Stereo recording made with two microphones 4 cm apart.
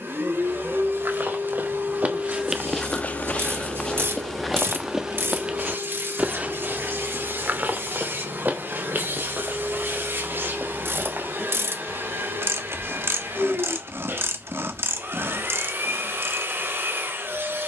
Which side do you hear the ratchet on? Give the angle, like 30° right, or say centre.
70° right.